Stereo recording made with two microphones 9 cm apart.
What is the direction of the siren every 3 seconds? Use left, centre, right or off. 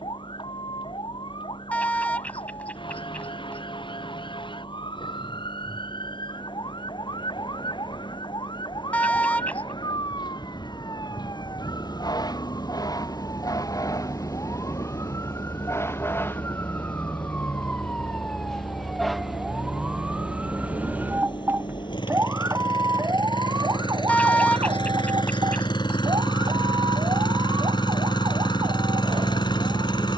left, left, left, left, left, left, centre, right, right, right.